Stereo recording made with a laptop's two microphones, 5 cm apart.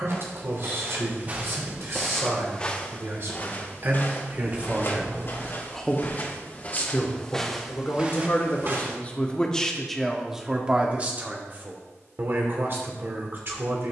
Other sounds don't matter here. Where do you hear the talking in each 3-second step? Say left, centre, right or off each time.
right, right, left, centre, right.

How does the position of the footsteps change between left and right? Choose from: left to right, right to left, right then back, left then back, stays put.
left then back.